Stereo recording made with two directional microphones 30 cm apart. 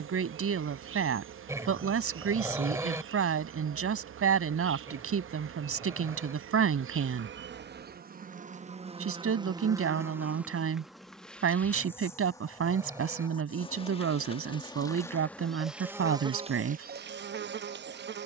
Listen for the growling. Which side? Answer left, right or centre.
centre.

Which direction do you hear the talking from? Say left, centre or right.
right.